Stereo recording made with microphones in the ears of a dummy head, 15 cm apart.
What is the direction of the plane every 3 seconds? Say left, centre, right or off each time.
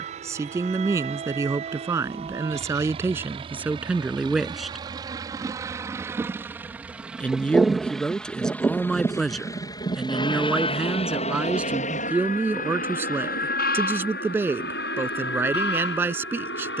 right, right, centre, left, left, left.